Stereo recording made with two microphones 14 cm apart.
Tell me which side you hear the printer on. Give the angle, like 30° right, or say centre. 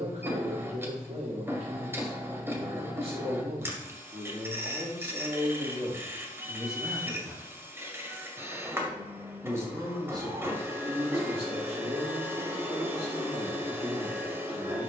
20° right.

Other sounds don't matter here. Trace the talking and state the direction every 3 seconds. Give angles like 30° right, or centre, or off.
50° right, 30° right, centre, 30° right, 50° right.